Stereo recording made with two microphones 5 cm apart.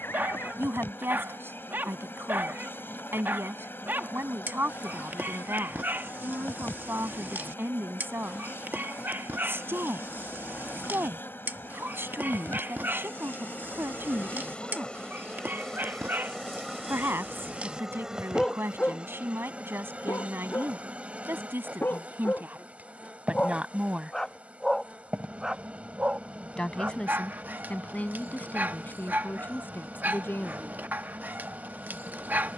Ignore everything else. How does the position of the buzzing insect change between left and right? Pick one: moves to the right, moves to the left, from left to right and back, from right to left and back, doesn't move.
moves to the right.